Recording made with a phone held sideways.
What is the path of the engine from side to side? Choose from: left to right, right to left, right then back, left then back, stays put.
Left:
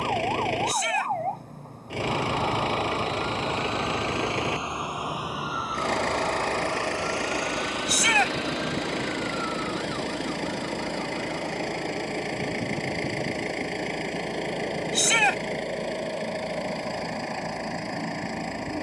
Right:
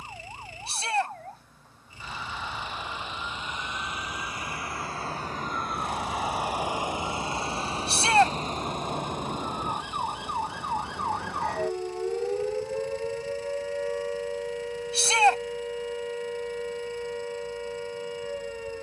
stays put.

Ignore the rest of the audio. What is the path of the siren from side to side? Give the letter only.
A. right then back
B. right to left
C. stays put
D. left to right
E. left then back
D.